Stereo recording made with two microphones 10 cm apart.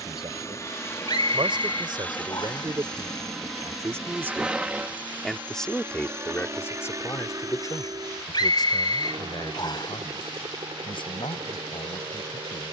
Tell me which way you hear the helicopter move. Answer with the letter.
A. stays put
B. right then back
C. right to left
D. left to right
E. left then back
D.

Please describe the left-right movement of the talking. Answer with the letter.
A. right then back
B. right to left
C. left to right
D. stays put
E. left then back
B.